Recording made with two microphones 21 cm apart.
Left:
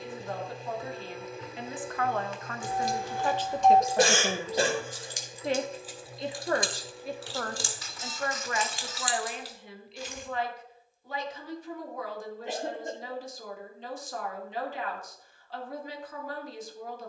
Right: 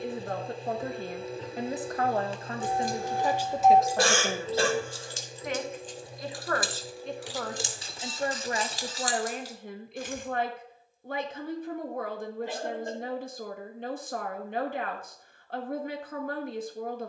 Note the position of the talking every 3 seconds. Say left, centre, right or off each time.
right, centre, centre, right, right, right.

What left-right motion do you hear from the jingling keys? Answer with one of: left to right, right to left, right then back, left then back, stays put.
left then back.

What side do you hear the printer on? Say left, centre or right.
right.